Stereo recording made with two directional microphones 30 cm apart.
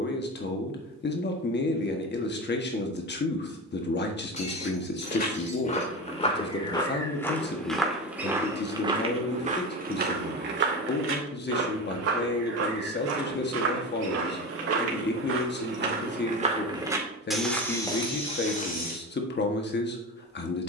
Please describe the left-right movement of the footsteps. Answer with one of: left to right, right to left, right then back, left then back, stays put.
right then back.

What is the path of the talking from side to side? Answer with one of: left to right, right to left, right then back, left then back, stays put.
stays put.